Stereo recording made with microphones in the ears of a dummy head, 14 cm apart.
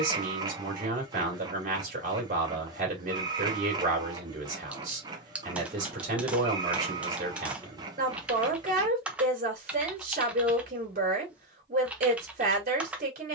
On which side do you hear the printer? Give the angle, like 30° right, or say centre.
30° right.